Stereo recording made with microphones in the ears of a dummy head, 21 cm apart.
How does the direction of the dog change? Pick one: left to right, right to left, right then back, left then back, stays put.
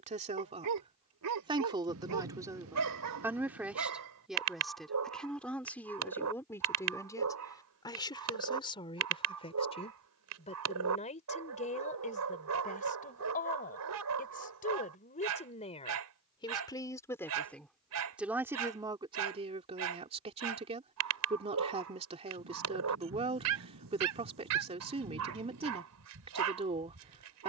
stays put.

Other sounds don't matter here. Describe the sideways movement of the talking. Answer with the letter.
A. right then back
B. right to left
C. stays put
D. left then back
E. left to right
D.